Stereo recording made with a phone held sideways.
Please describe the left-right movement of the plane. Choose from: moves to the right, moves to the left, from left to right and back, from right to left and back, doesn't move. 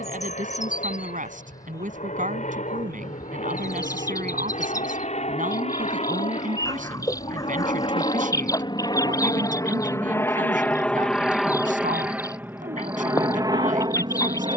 moves to the right.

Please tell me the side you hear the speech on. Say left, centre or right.
right.